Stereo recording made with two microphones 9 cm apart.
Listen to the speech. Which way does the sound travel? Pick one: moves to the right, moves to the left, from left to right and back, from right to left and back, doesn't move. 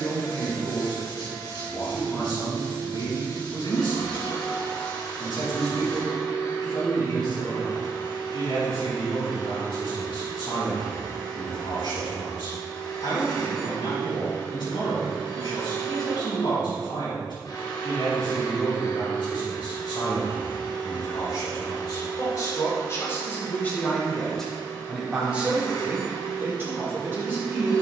moves to the right.